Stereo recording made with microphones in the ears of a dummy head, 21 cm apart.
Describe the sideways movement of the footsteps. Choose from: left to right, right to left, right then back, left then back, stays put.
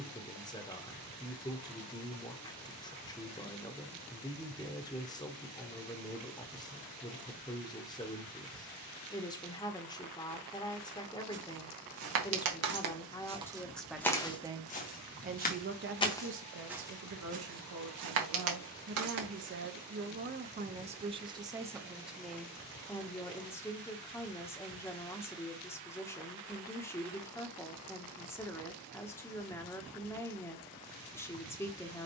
left then back.